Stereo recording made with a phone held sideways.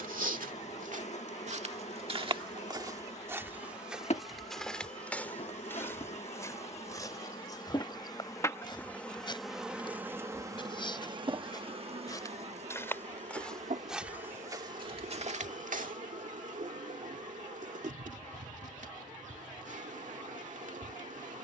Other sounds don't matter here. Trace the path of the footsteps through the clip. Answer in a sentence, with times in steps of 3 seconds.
In this clip you hear the footsteps on the right from 0 s, in the centre from 3 s, on the left from 6 s, in the centre from 12 s, on the right from 15 s and not at all from 18 s.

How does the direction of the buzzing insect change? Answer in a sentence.
You can hear the buzzing insect go from the left side to the right.